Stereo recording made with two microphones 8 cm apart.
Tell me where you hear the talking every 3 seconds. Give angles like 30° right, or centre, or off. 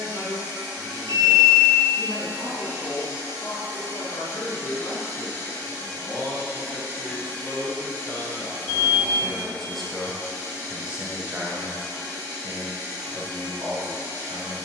60° left, 50° left, 30° left, 10° right, 50° right.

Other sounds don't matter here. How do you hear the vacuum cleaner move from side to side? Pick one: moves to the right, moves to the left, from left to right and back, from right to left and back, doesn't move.
doesn't move.